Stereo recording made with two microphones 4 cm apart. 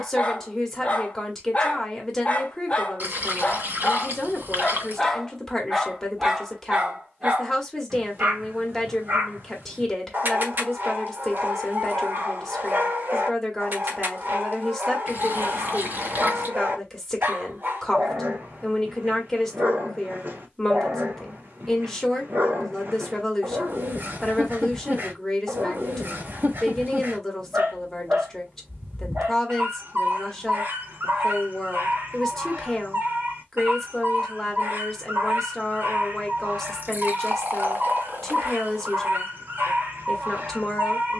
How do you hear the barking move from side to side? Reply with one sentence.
You can hear the barking move to the right.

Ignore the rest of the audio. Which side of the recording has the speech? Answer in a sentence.
In this clip you hear the speech in the centre.